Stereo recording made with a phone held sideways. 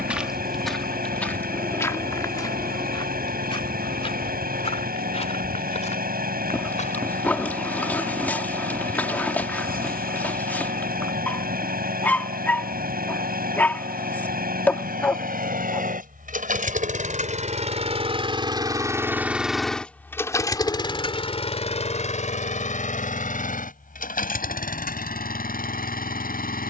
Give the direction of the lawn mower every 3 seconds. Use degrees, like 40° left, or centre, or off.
70° right, 70° right, 70° right, 70° right, 70° right, 60° right, centre, 50° left, 70° left.